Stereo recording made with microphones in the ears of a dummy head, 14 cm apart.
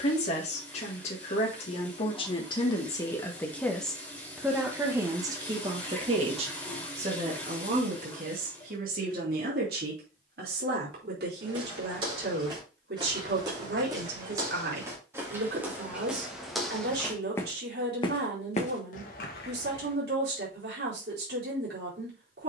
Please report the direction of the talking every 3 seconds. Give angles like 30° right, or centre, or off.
40° left, 10° right, 50° right, 60° right, 70° right, 70° right, 70° right, 70° right.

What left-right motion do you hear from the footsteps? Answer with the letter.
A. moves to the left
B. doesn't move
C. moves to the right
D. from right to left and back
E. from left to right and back
A.